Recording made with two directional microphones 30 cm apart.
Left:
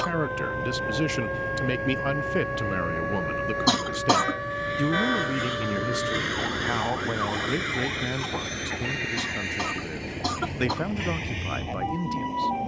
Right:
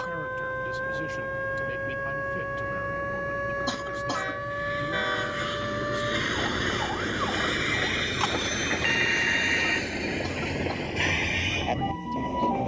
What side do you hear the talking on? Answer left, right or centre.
left.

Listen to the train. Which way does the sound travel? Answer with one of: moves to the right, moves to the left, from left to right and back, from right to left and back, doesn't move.
moves to the right.